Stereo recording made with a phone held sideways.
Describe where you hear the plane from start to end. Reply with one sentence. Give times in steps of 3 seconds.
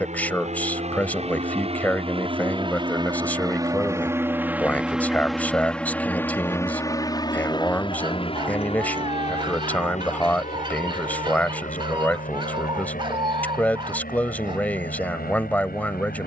You can hear the plane on the right from 0 s, in the centre from 3 s and on the left from 6 s.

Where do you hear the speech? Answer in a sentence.
You can hear the speech in the centre.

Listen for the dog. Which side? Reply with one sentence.
You can hear the dog on the right.